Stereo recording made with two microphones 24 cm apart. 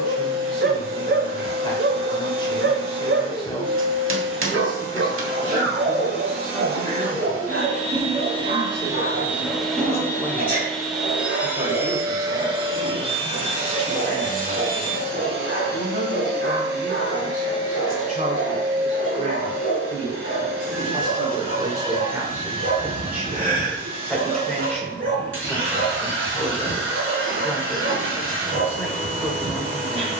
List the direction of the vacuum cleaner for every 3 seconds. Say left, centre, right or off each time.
right, right, right, centre, right, right, right, right, right, right.